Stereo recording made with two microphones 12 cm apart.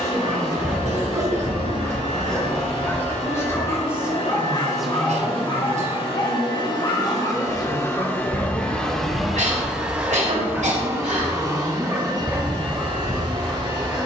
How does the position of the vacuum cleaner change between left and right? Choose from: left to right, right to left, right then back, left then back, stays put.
left to right.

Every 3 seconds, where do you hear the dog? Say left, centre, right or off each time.
centre, left, left, centre, centre.